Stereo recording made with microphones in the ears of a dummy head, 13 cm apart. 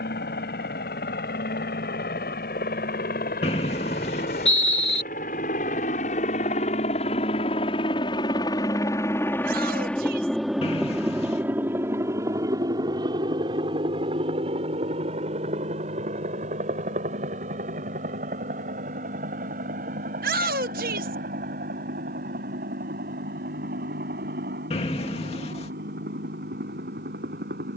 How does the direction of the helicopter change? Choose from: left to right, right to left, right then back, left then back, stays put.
left to right.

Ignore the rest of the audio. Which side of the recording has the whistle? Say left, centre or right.
left.